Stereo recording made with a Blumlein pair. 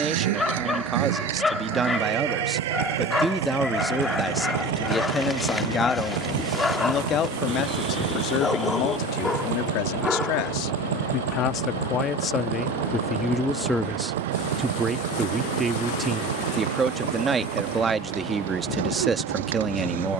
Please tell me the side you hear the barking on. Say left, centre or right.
centre.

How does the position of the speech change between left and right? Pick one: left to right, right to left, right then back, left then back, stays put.
left then back.